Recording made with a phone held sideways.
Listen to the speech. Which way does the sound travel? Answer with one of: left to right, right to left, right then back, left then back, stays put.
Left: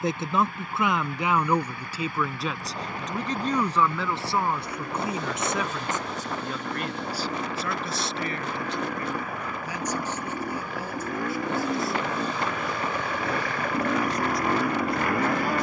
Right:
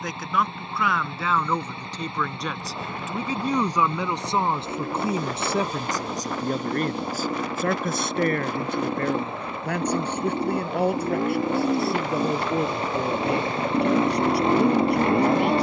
left to right.